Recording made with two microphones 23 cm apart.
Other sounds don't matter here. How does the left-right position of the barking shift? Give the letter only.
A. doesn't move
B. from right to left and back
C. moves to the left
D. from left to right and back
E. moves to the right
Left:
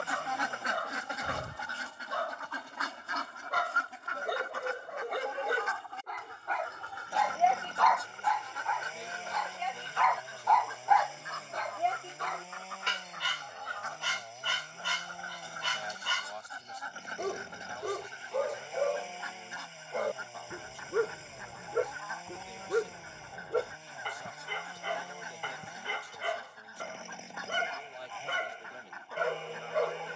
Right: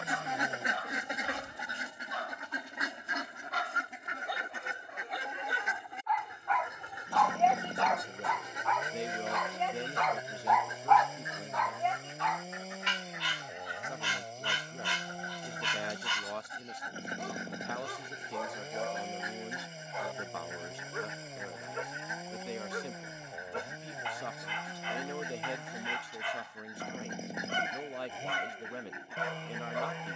D.